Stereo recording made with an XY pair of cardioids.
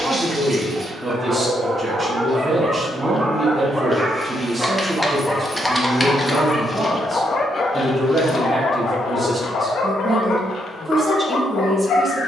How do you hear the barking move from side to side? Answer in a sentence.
In this clip you hear the barking go from the right side to the left.